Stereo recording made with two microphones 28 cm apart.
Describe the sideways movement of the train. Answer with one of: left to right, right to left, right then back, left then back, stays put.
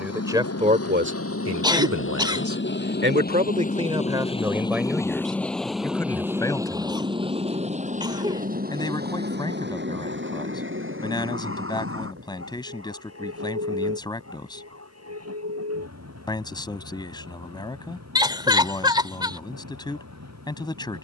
left to right.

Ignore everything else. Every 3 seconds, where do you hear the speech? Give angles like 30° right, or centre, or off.
40° right, 10° right, 10° left, 10° left, 10° left, 10° left, 10° left.